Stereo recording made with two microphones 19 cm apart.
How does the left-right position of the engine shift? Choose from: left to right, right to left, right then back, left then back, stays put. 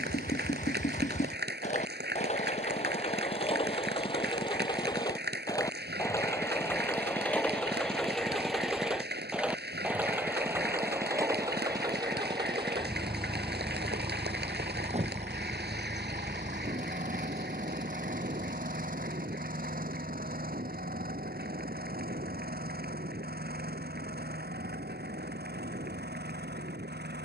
left to right.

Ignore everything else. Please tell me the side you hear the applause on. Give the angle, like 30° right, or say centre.
60° right.